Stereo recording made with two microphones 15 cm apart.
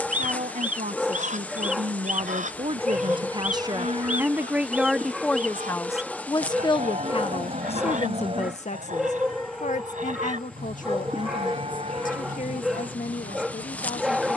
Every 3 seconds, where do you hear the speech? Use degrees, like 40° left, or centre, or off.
50° right, 10° right, 40° left, 60° left, 70° left.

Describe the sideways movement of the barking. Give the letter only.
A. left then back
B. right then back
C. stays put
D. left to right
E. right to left
C.